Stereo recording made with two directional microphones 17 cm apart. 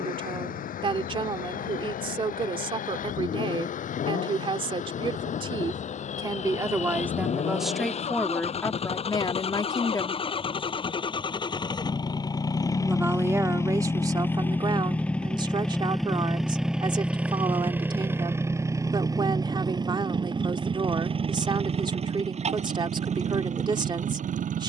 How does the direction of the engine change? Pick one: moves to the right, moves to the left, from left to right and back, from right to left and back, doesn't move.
moves to the right.